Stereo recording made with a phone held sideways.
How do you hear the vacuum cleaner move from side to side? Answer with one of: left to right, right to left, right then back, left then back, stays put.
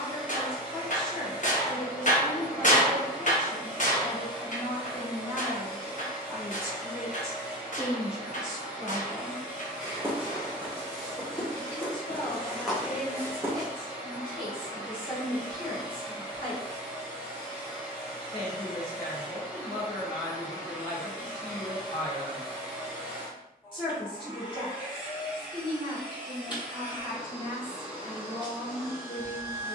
stays put.